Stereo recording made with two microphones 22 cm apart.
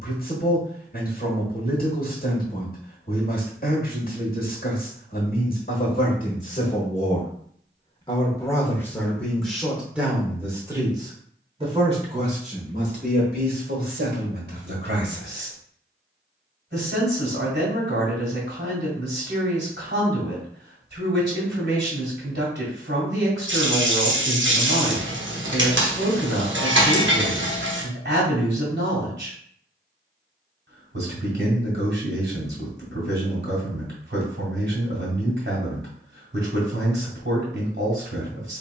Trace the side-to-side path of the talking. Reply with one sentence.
You can hear the talking move from left to right.